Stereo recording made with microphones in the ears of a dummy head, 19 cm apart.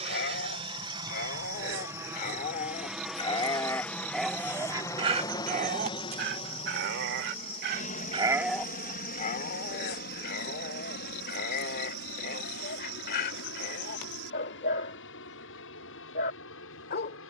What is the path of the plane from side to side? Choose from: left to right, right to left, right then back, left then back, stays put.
right to left.